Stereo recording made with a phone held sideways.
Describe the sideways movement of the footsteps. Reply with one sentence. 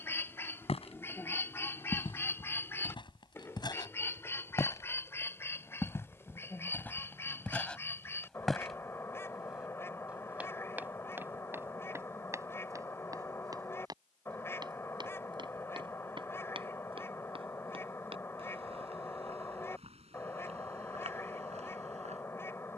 You can hear the footsteps move from left to right.